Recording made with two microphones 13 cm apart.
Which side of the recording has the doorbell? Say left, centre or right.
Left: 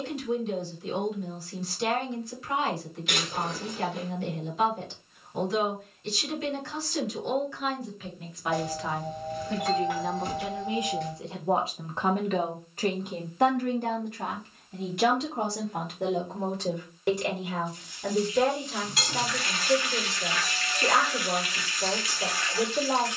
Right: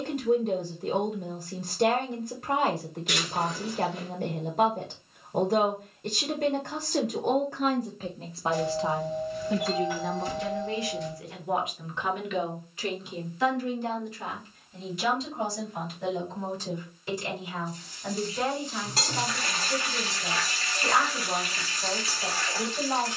left.